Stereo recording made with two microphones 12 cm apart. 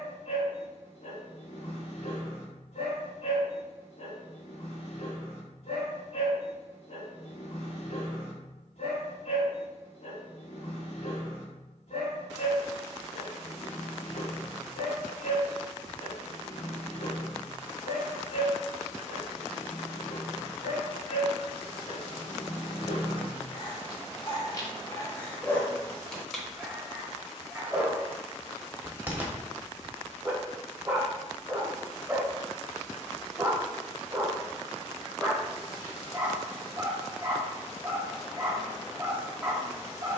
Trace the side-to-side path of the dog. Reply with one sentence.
In this clip you hear the dog travel towards the right.